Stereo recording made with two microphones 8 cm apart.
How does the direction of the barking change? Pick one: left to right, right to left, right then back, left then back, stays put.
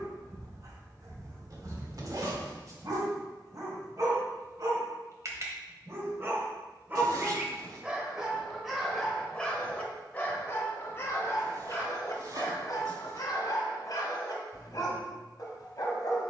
right to left.